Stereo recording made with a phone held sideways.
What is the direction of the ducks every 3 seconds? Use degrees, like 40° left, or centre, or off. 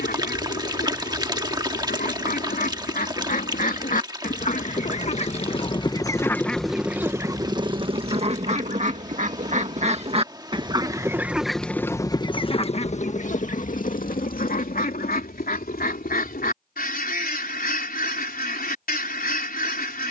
80° left, 50° left, 20° right, 30° right, 50° left, 80° left, 80° left.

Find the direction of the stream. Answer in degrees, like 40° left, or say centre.
30° right.